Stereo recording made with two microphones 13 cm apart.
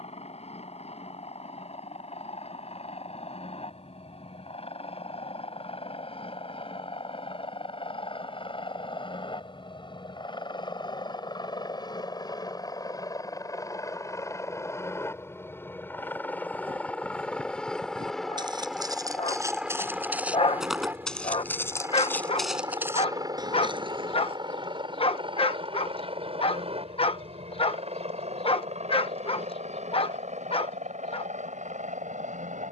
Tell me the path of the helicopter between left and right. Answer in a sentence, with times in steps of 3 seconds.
You can hear the helicopter on the left from 0 s, in the centre from 15 s and on the right from 21 s.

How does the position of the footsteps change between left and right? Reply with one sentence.
You can hear the footsteps go left and come back.